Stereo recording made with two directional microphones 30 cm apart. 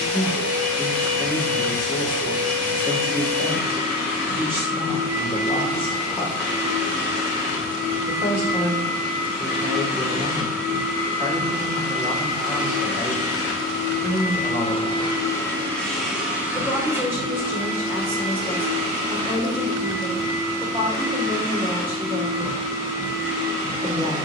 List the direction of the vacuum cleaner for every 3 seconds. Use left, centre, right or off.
left, left, left, left, left, centre, right, right.